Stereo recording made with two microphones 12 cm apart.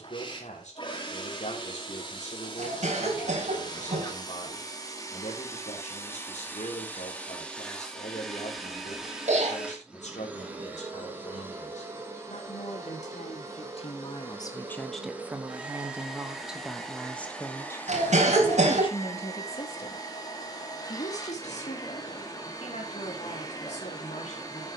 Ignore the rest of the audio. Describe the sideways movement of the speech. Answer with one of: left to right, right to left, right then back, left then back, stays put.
right then back.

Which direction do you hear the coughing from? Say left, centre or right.
right.